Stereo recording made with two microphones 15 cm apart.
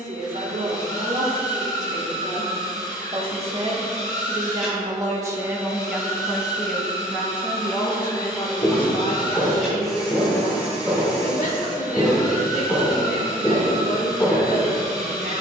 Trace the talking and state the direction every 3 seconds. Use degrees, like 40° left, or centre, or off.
50° right, 30° right, 20° left, 50° left, 70° left.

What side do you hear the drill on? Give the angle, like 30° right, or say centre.
centre.